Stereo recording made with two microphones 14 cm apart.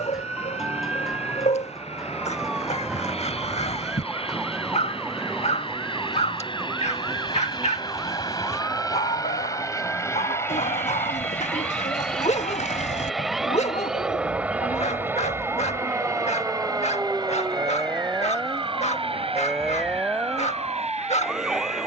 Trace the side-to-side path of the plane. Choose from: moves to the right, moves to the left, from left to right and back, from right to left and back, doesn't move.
moves to the right.